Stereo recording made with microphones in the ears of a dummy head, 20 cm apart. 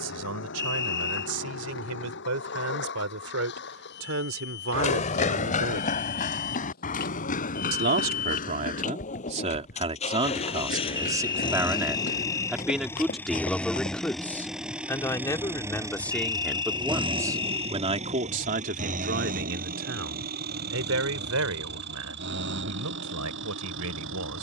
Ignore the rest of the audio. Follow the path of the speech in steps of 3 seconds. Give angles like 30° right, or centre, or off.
80° right, 70° right, 40° right, 20° right, centre, centre, 50° right, 80° right.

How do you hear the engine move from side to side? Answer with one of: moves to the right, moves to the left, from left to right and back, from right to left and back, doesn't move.
moves to the right.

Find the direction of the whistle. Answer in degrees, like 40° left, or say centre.
20° left.